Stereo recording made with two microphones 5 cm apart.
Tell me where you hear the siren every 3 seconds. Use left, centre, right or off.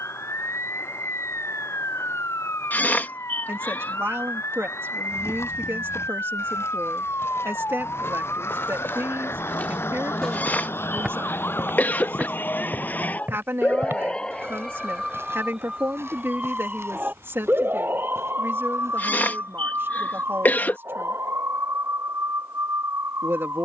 left, left, left, left, left, right, right, right.